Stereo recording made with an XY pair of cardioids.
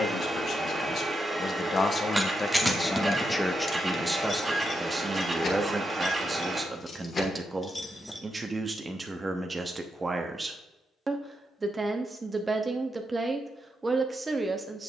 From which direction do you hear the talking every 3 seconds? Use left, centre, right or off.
left, centre, right, right, right.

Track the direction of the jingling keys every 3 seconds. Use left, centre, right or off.
centre, left, left, off, off.